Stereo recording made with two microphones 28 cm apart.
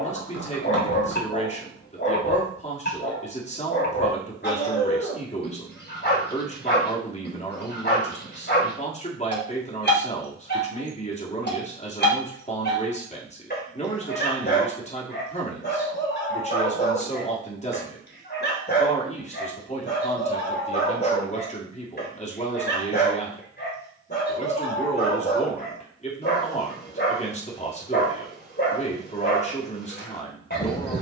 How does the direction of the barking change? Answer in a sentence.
In this clip you hear the barking stay put.